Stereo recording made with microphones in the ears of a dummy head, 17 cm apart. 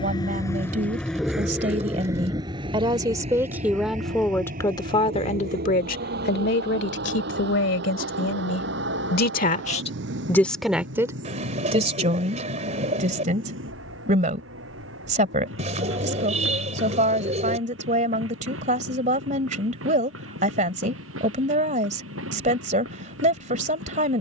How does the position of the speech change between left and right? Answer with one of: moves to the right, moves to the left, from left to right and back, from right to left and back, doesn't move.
from right to left and back.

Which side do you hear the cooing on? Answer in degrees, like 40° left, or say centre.
40° right.